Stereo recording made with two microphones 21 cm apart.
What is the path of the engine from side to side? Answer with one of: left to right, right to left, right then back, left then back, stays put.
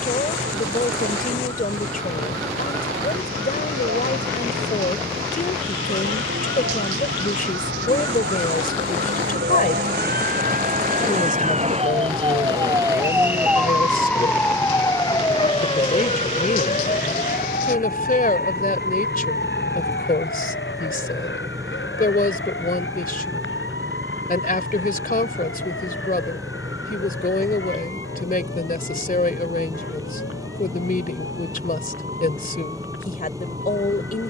stays put.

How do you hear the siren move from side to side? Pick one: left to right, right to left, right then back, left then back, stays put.
right to left.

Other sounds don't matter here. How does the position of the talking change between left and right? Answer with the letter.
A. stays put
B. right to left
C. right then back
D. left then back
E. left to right
A.